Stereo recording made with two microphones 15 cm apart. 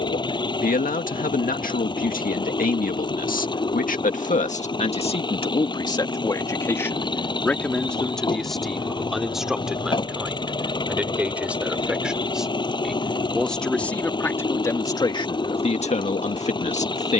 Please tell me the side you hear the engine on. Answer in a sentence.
You can hear the engine on the left.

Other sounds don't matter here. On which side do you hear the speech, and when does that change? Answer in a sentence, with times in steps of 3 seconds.
You can hear the speech on the left from 0 s, in the centre from 6 s and on the left from 15 s.